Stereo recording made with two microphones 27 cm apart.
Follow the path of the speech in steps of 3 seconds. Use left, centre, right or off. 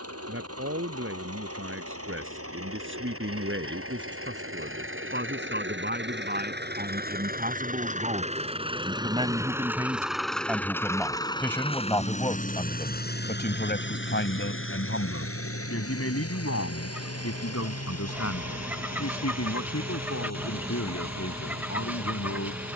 right, right, right, centre, left, left, left, left.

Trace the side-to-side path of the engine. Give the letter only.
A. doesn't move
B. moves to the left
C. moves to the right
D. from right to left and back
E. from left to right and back
B.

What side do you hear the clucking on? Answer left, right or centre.
centre.